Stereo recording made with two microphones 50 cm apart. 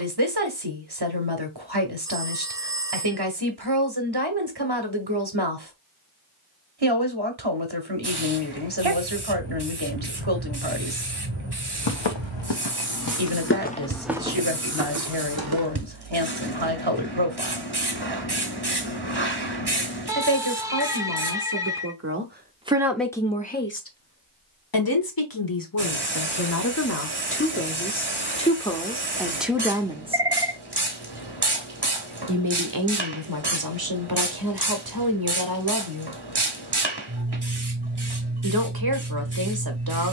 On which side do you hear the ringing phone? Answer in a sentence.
In this clip you hear the ringing phone in the centre.